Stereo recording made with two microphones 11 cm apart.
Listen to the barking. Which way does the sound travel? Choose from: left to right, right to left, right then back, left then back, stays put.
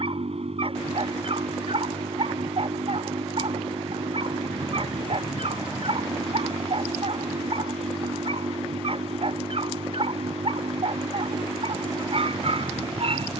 stays put.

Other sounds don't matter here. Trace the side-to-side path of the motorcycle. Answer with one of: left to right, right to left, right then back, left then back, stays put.
stays put.